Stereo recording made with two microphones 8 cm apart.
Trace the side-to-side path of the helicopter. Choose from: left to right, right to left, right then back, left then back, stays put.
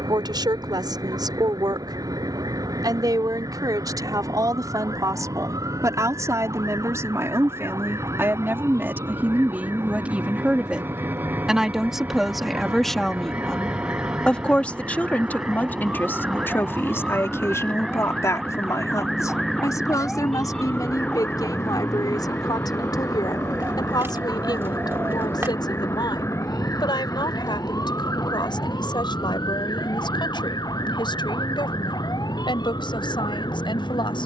right to left.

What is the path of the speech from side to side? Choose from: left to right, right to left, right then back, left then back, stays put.
right to left.